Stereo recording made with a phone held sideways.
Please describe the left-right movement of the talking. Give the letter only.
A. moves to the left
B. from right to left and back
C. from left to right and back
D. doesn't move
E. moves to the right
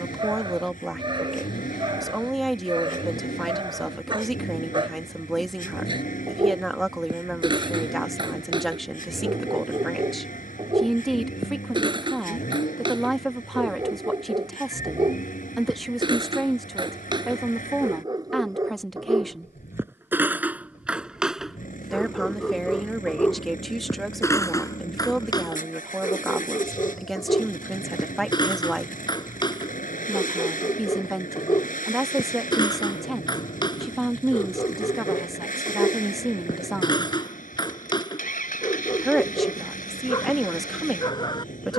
D.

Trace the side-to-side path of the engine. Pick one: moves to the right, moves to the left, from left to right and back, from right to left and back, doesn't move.
doesn't move.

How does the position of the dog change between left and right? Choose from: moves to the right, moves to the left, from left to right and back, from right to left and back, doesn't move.
moves to the left.